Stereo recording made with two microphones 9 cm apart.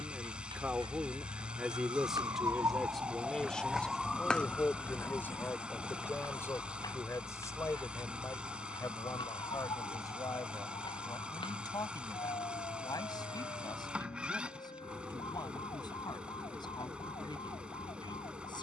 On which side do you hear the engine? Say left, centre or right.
centre.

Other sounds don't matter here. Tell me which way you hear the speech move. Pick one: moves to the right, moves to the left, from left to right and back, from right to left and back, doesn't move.
moves to the left.